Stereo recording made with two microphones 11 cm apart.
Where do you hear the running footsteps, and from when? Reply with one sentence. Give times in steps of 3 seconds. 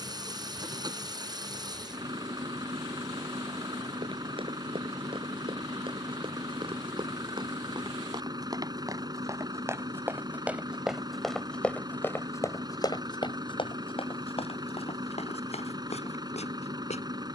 You can hear the running footsteps not at all from 0 s, on the right from 3 s, in the centre from 9 s and on the left from 12 s.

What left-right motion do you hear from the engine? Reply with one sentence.
In this clip you hear the engine stay in one place.